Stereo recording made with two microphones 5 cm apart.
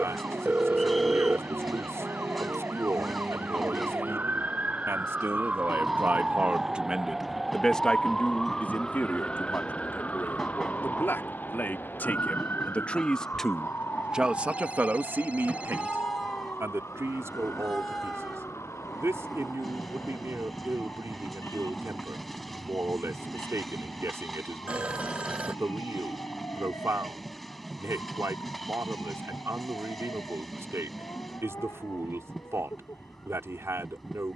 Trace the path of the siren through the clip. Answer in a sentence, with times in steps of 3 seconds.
You can hear the siren on the right from 0 s, in the centre from 6 s and on the left from 9 s.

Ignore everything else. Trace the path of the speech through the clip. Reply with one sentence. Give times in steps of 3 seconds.
In this clip you hear the speech on the right from 0 s, in the centre from 6 s, on the left from 9 s, in the centre from 12 s and on the right from 15 s.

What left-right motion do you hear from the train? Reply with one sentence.
You can hear the train stay put.